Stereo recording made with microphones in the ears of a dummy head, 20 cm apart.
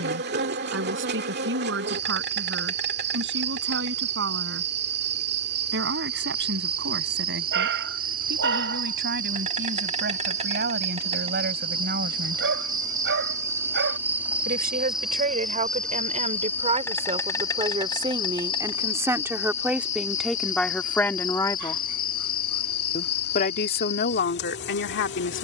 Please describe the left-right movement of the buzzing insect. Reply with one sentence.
You can hear the buzzing insect move from right to left.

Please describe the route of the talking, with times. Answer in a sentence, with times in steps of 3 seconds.
You can hear the talking on the right from 0 s, in the centre from 18 s and on the left from 21 s.